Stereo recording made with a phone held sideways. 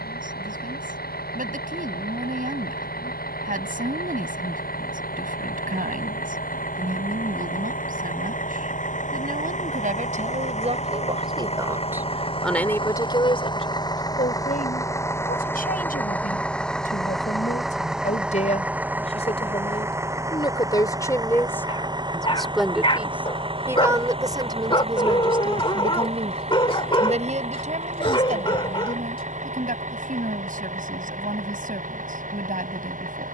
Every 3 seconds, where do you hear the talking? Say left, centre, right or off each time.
right, right, right, right, left, left, left, centre, right, right, right.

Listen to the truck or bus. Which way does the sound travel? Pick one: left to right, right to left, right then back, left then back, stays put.
left to right.